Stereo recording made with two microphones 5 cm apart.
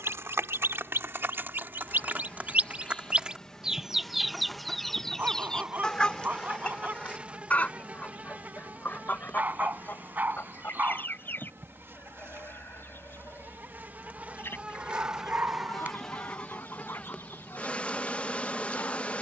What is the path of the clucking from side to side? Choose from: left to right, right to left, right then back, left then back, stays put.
right to left.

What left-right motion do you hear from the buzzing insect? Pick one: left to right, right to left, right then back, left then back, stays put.
right then back.